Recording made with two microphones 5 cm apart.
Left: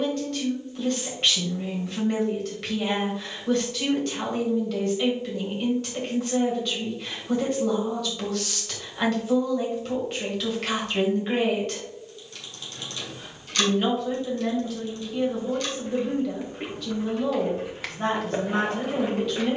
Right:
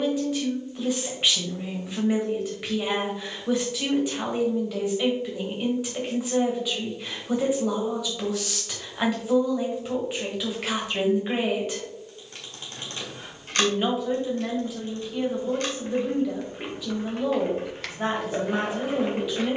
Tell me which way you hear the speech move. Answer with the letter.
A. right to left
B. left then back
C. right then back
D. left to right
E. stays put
E.